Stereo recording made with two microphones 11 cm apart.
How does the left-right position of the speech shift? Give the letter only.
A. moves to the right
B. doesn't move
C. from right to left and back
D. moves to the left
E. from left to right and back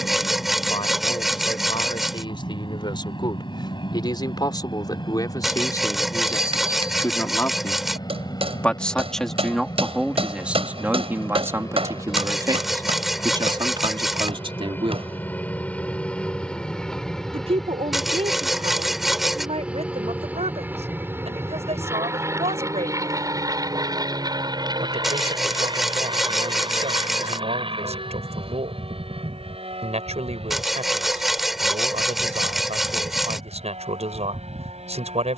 A.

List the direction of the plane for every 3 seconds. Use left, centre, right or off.
left, left, left, left, left, centre, centre, right, right, right, right, right.